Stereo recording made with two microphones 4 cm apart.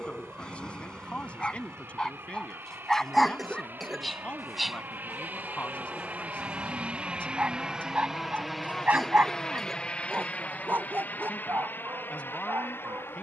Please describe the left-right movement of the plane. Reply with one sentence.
You can hear the plane go from the right side to the left.